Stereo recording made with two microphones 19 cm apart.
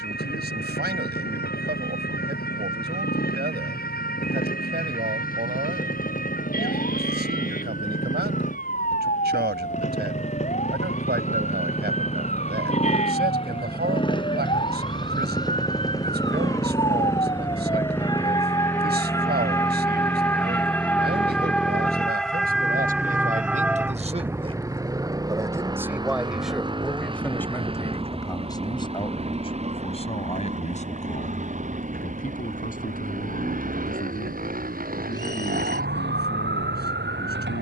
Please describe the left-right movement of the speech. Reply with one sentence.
You can hear the speech move to the left.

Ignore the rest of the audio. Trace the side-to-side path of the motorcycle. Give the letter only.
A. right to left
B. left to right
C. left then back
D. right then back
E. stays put
B.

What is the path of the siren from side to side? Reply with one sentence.
You can hear the siren travel towards the right.